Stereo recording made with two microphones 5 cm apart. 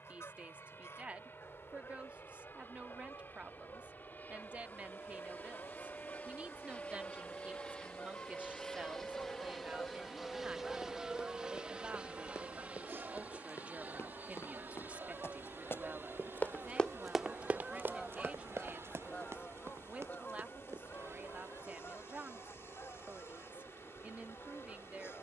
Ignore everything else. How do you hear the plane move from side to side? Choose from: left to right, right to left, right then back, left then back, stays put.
left to right.